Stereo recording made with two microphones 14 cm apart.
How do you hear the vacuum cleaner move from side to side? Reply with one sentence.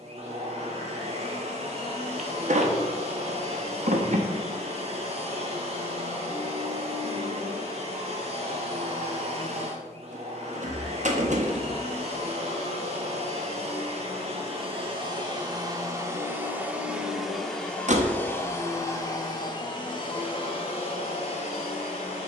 You can hear the vacuum cleaner move from right to left.